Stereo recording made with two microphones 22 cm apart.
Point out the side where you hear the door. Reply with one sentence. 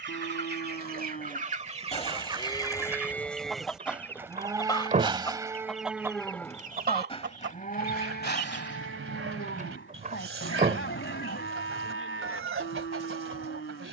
You can hear the door on the right.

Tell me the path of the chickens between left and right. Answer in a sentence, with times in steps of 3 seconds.
You can hear the chickens on the right from 0 s, in the centre from 3 s and on the right from 6 s.